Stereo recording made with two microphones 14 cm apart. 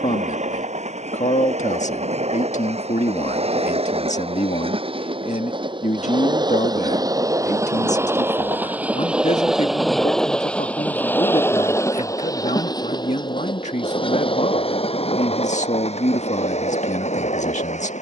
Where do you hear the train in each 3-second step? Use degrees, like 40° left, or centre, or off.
60° right, 40° right, 20° right, 10° left, 30° left, 50° left.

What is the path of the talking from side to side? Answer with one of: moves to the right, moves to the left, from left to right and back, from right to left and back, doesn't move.
doesn't move.